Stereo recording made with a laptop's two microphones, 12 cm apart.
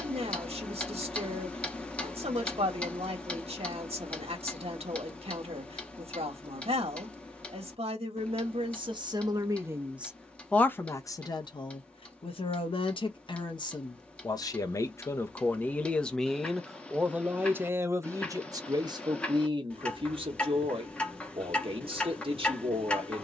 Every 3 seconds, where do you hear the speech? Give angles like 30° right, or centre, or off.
60° right, 60° right, 50° right, 10° left, 40° left, centre, 40° right, 50° right.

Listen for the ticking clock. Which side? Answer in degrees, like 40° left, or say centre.
10° left.